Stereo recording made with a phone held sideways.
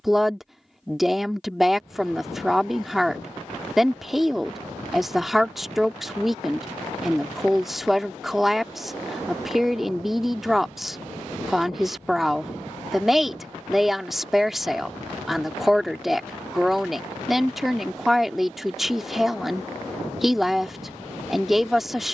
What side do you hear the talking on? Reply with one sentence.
In this clip you hear the talking in the centre.